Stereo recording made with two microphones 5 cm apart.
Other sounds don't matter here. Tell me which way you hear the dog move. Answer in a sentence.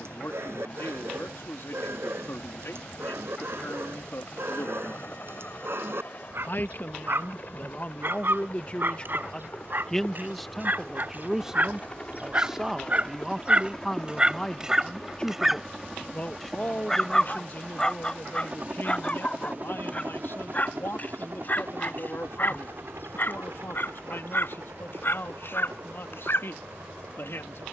In this clip you hear the dog travel towards the left.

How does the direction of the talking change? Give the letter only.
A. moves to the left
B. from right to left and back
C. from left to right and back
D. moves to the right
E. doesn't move
C.